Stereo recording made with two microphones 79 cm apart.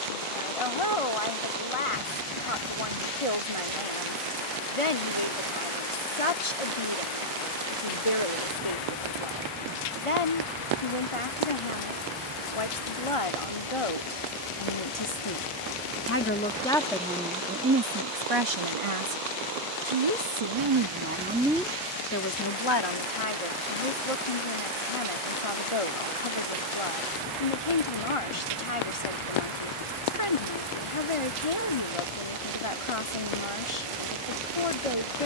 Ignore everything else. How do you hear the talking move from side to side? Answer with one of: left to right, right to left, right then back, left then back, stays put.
right then back.